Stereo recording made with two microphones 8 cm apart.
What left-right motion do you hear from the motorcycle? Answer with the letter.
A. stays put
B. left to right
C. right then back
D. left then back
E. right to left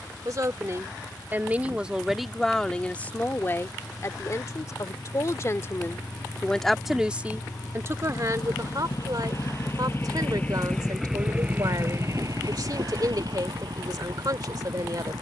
B.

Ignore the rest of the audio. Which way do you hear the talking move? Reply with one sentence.
You can hear the talking go left and come back.